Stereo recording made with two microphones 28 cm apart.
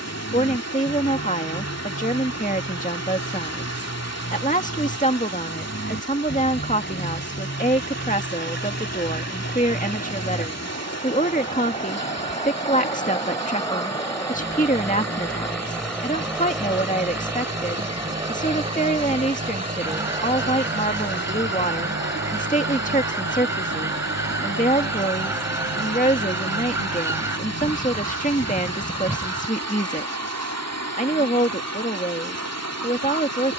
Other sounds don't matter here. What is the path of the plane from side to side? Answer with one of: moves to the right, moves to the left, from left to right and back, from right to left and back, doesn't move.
moves to the right.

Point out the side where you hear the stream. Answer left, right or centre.
left.